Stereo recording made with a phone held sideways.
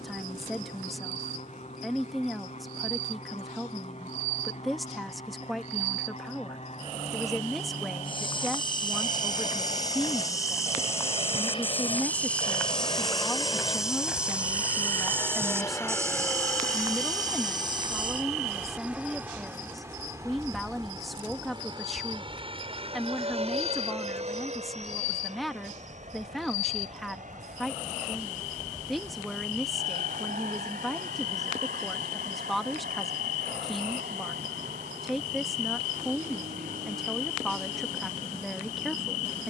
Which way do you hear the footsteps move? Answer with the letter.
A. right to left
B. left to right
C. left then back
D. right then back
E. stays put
B.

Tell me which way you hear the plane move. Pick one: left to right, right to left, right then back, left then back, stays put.
left to right.